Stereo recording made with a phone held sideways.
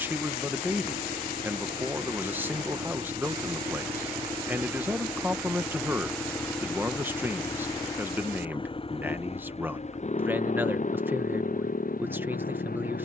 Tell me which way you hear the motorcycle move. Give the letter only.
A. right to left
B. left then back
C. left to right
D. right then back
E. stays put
A.